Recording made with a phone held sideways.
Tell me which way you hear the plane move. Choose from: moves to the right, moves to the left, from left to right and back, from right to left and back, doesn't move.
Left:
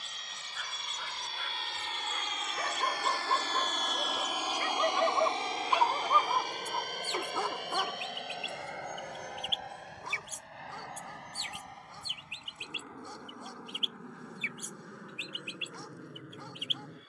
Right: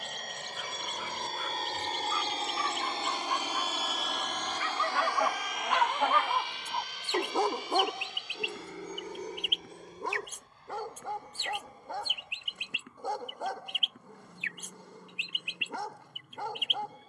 moves to the left.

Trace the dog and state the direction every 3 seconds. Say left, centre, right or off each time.
left, left, right, right, right, right.